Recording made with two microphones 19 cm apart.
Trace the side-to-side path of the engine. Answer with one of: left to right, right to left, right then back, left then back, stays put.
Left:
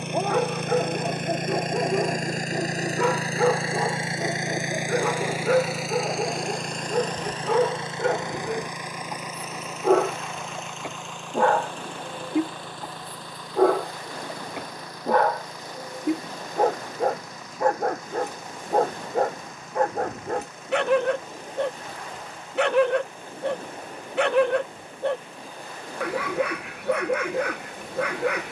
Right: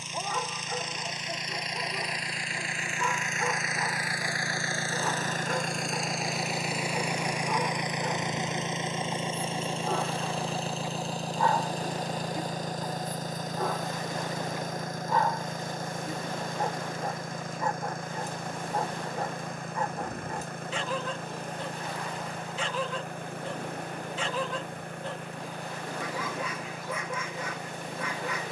left to right.